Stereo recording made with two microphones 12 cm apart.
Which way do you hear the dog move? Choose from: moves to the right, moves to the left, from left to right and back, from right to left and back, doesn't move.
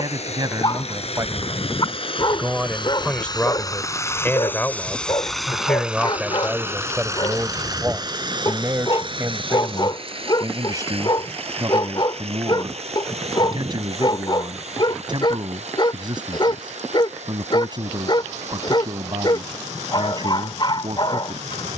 doesn't move.